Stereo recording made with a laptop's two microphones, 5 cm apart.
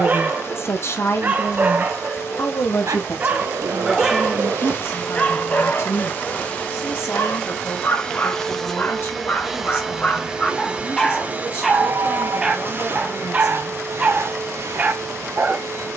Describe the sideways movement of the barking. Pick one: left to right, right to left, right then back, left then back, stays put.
left then back.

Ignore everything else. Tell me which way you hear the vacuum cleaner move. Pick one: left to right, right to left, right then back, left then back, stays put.
left to right.